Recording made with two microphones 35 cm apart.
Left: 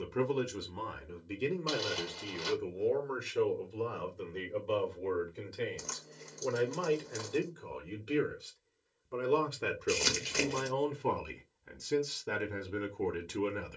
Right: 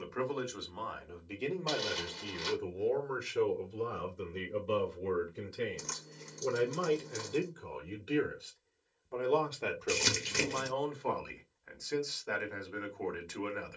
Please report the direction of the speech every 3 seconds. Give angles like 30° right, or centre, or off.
20° left, 10° right, centre, 30° left, 40° left.